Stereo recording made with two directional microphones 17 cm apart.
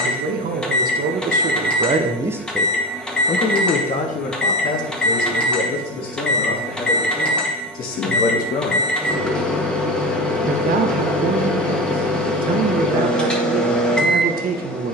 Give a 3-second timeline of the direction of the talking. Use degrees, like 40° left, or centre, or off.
40° right, 50° left, 60° left, 60° right, 60° right.